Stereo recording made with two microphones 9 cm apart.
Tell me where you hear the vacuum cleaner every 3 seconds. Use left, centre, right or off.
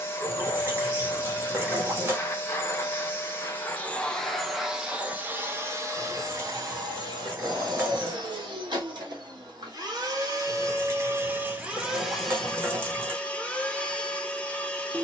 left, centre, right, right, centre.